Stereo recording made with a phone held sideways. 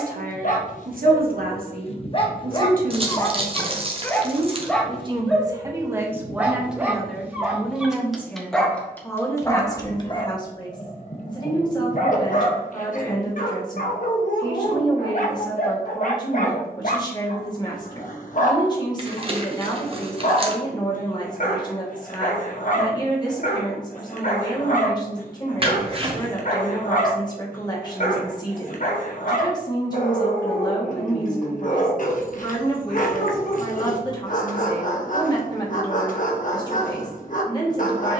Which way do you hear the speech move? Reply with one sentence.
In this clip you hear the speech go from the right side to the left.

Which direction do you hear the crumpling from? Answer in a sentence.
You can hear the crumpling on the right.